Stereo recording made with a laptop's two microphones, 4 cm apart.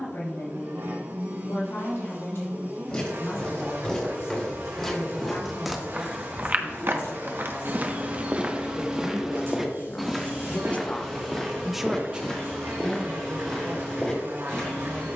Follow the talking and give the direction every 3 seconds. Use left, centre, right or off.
left, left, left, left, right.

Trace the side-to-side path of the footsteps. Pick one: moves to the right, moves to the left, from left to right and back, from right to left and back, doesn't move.
from left to right and back.